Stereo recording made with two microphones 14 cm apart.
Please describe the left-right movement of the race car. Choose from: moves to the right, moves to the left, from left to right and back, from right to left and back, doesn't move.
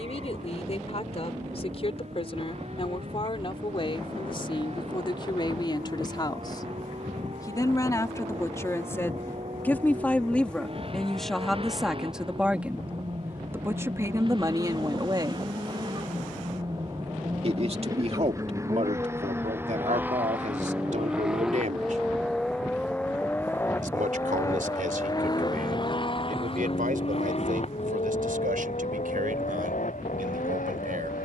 moves to the left.